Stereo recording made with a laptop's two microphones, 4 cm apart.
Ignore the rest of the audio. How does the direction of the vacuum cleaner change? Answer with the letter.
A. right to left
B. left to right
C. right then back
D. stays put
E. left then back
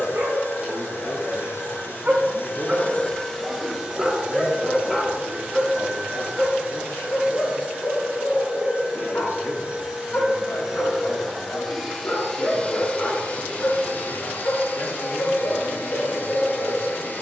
C.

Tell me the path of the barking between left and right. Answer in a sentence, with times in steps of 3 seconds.
You can hear the barking on the right from 0 s, in the centre from 3 s and on the left from 6 s.